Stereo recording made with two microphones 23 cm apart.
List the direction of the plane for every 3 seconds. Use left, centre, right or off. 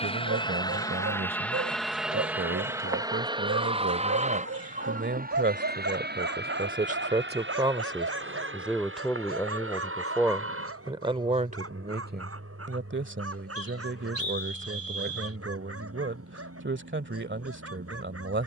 centre, right, right, right, right, right.